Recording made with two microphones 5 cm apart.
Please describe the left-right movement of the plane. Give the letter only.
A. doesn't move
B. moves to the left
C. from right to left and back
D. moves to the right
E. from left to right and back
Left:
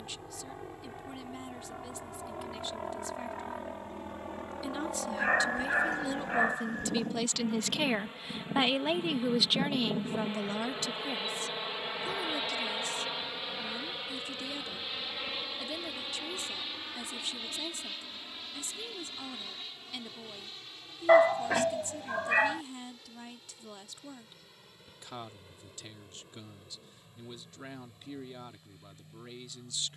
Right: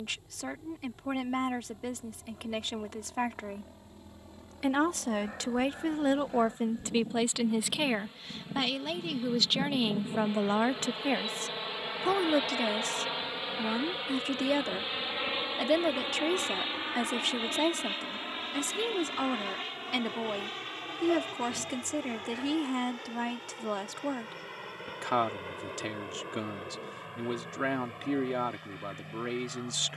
D.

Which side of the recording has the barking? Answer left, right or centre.
left.